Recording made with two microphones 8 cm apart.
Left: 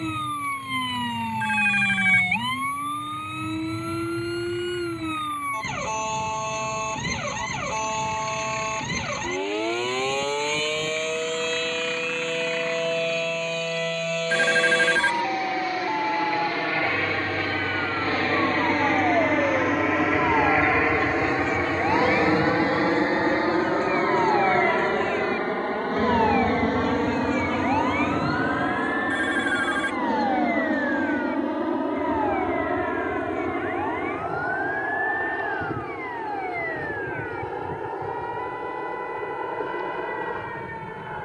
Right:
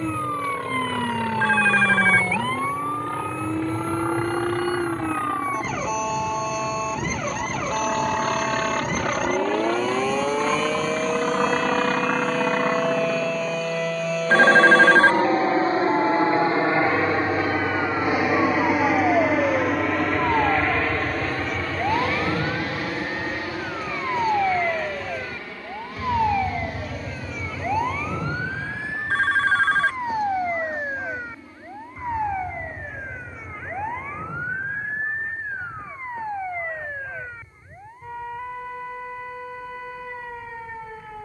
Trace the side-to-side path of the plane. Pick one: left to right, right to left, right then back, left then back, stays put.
right to left.